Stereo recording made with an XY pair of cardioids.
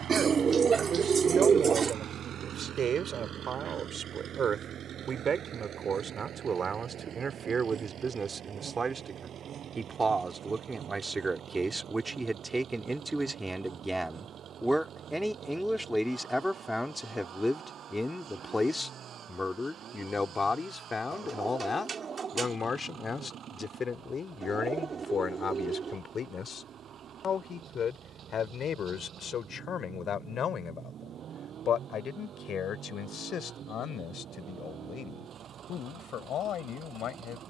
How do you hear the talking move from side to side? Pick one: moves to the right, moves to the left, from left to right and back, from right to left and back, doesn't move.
moves to the left.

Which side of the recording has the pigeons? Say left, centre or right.
right.